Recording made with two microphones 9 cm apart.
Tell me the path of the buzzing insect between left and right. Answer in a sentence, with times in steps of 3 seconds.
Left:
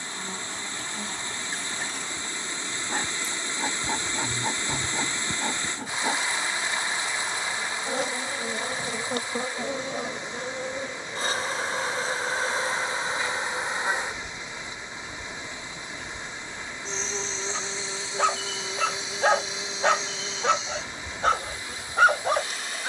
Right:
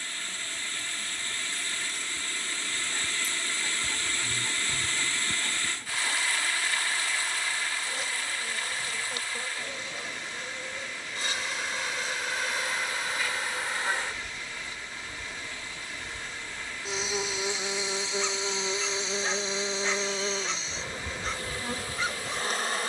You can hear the buzzing insect on the left from 0 s, in the centre from 15 s and on the right from 18 s.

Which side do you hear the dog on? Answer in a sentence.
In this clip you hear the dog on the left.